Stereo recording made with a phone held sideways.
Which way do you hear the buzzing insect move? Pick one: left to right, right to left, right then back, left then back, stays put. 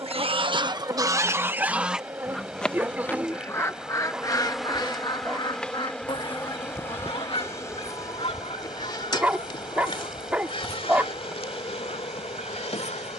right to left.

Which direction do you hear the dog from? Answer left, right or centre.
centre.